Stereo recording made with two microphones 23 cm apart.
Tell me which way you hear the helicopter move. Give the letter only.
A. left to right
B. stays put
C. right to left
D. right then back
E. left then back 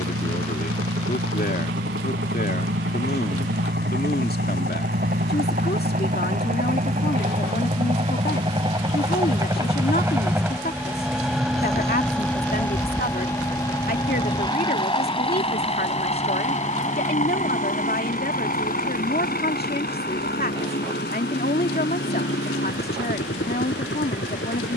C.